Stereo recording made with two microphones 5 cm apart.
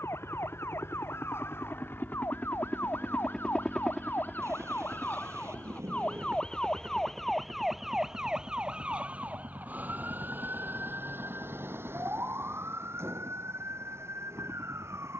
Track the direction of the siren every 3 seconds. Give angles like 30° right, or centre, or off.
60° left, 40° left, centre, 40° right, 60° right.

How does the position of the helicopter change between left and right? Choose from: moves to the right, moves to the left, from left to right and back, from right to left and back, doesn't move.
moves to the right.